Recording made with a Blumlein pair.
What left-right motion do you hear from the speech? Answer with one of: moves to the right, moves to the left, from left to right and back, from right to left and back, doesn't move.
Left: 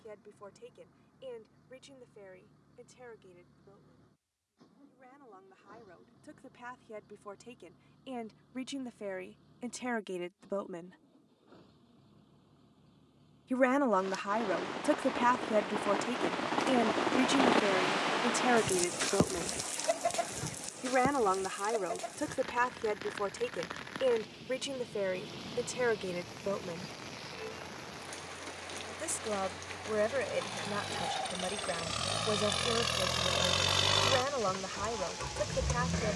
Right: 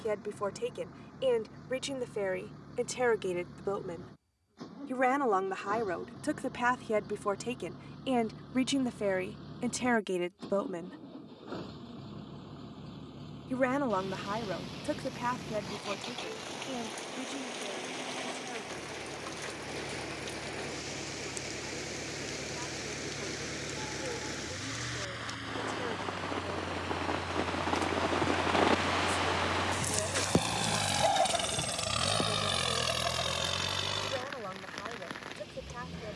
moves to the left.